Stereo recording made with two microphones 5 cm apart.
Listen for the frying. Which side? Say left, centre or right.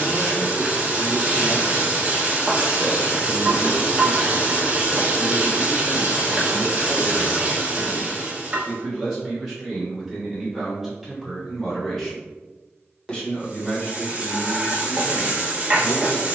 right.